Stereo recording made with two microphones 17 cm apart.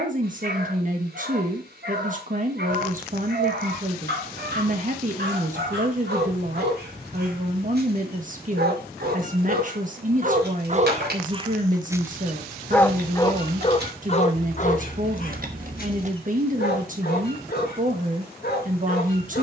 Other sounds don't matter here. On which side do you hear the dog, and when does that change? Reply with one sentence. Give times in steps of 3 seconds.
You can hear the dog on the right from 0 s and on the left from 12 s.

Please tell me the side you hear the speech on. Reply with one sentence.
In this clip you hear the speech on the right.